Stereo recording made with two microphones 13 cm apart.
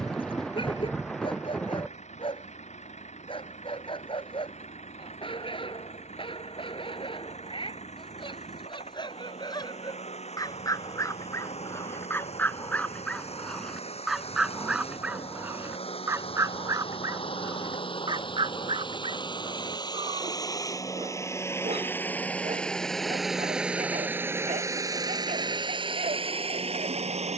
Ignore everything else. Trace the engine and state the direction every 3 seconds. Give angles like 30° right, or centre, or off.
60° left, 60° left, 60° left, 60° left, 50° left, 50° left, 30° left, 10° left, 40° right.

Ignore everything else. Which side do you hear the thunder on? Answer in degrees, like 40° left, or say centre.
centre.